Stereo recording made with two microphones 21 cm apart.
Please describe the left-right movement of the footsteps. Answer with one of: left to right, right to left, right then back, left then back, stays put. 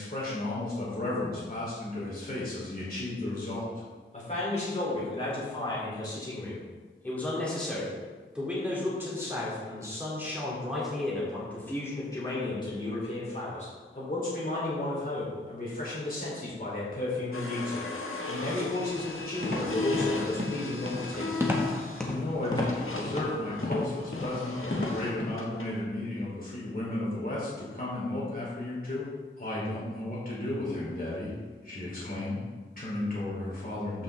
right to left.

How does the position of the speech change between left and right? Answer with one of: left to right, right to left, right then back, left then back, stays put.
right then back.